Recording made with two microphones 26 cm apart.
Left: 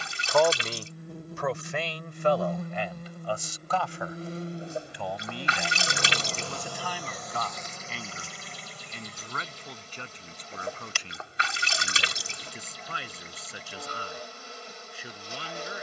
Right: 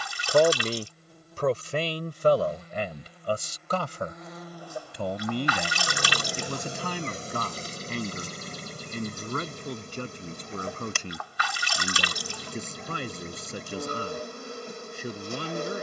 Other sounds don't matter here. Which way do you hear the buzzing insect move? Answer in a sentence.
In this clip you hear the buzzing insect move from left to right.